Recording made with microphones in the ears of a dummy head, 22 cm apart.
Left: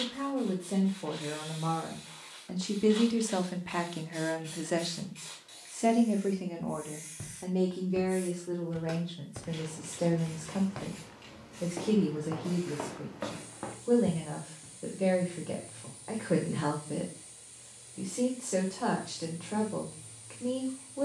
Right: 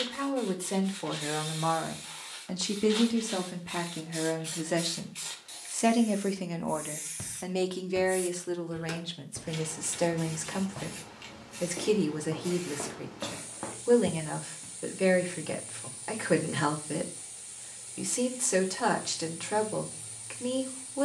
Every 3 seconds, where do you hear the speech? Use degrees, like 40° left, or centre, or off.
60° right, centre, 50° right, 70° right, 70° right, 70° right, 70° right.